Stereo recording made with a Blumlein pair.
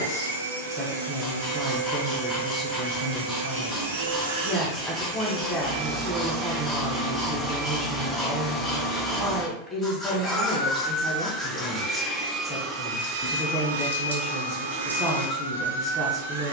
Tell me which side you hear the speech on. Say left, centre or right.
centre.